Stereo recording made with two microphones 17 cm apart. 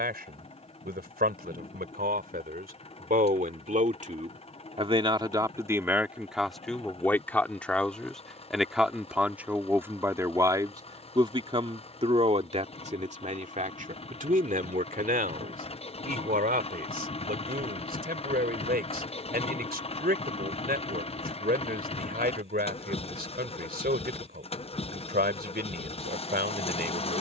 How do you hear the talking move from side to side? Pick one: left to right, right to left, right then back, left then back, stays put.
left then back.